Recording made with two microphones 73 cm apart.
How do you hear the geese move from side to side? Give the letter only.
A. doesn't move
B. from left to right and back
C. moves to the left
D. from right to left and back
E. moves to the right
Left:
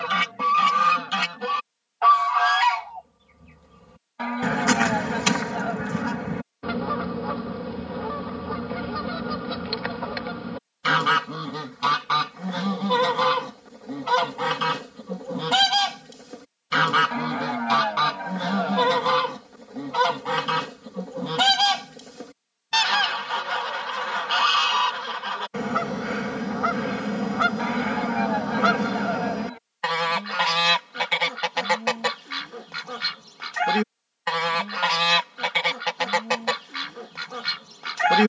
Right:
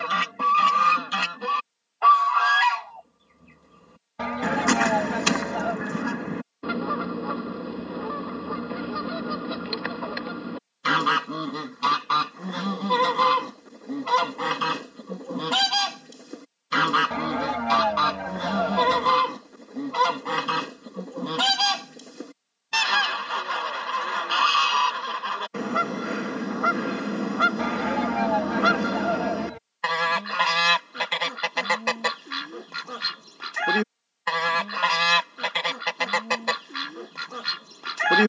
A.